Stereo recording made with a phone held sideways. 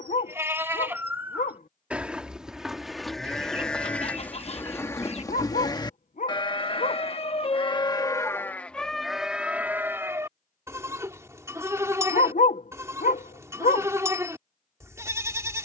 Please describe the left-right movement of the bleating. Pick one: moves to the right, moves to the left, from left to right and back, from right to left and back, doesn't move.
from right to left and back.